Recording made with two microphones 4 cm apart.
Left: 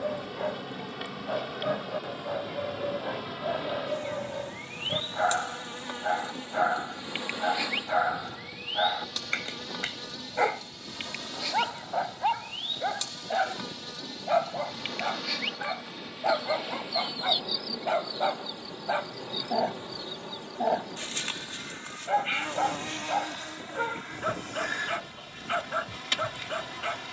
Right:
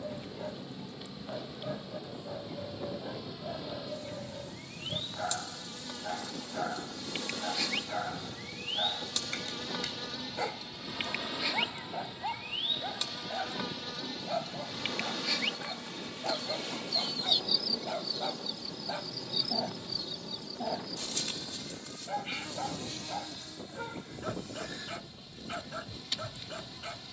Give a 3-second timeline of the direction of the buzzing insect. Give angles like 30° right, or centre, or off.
70° left, 50° left, 20° left, centre, 10° right, 10° left, 40° left, 50° left, 60° left.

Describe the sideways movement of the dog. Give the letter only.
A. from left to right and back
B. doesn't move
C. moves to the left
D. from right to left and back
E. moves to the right
B.